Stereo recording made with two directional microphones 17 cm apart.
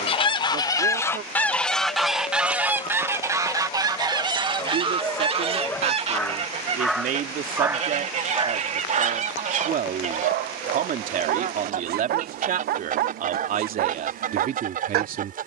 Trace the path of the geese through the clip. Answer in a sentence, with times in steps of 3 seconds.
You can hear the geese in the centre from 0 s and on the right from 3 s.